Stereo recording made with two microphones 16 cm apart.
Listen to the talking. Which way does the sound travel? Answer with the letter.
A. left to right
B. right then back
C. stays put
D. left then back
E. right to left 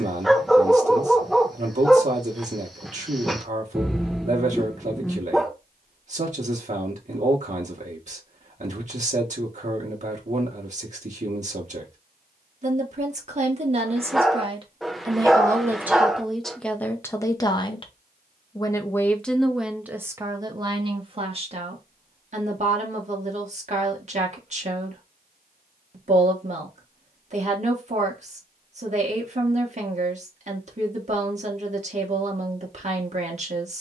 D.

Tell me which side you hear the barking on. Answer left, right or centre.
centre.